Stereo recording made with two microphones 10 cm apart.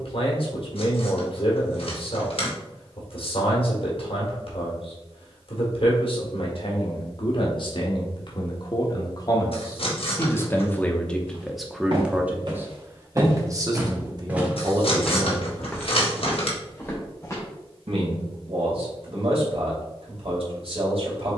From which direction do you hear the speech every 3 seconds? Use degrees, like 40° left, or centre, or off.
60° left, 60° left, 60° left, 20° left, 30° right, 50° right, 70° right.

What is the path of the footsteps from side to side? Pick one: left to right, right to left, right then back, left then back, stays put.
right to left.